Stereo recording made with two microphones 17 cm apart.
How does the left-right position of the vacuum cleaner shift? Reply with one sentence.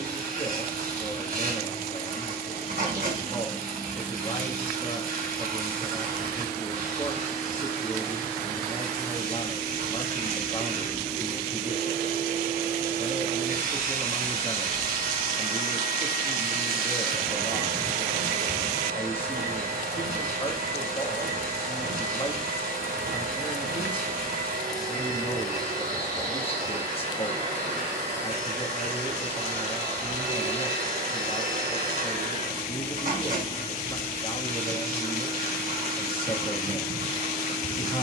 You can hear the vacuum cleaner stay in one place.